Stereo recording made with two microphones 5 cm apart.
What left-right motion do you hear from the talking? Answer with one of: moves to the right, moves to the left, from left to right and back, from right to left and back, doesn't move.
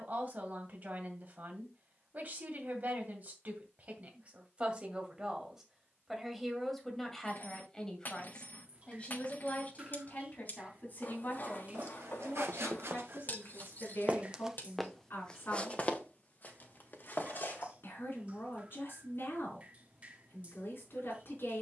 moves to the left.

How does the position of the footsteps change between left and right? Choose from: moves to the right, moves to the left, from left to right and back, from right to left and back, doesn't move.
moves to the left.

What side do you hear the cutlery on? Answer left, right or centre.
left.